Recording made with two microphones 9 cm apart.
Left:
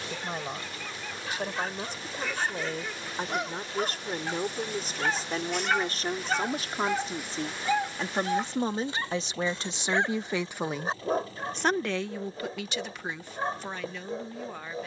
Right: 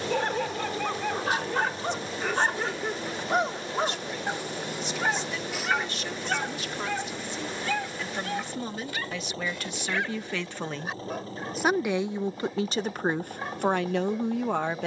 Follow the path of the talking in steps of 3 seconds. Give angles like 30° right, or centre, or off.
50° left, 40° left, 40° left, 10° left, 50° right.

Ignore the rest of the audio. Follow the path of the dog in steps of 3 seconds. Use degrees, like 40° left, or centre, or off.
60° right, 20° right, 20° left, 30° left, 30° left.